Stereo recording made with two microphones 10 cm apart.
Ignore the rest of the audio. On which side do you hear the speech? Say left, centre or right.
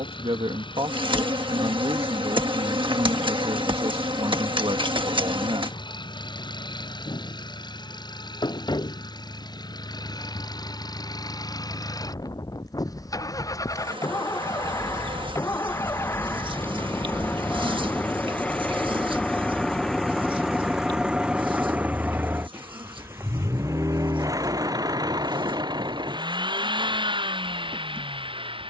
right.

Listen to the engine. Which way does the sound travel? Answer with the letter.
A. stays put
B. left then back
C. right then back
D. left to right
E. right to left
D.